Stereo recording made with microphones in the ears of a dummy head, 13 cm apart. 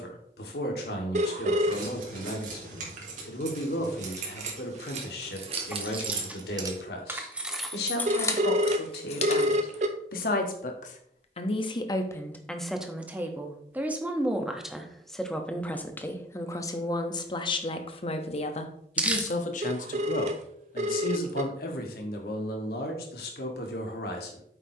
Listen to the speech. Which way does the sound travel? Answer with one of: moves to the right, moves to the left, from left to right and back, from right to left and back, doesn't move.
from left to right and back.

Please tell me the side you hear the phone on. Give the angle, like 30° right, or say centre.
50° right.